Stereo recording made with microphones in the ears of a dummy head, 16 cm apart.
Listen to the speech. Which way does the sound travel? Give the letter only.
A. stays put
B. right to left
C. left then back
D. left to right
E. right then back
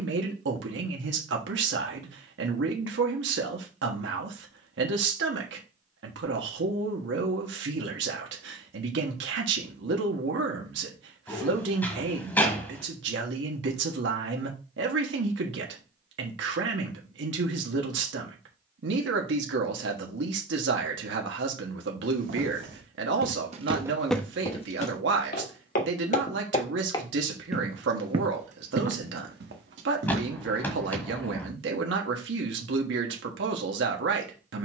A.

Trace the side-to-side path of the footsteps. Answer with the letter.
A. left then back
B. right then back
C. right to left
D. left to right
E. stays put
A.